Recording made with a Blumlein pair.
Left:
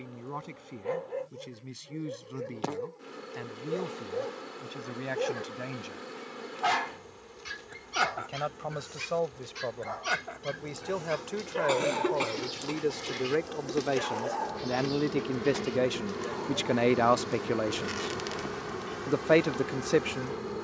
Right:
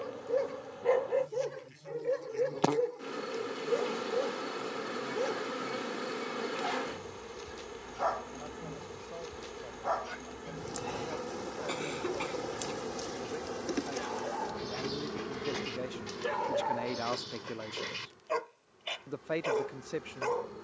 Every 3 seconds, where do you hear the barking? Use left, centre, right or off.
right, centre, left, left, left, right, right.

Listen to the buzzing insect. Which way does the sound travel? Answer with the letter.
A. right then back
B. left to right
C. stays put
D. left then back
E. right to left
E.